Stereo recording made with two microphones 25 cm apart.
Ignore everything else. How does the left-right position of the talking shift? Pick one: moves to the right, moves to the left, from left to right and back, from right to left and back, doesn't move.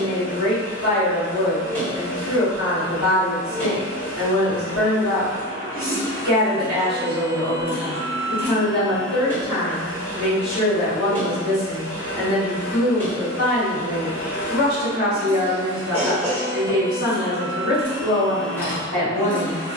doesn't move.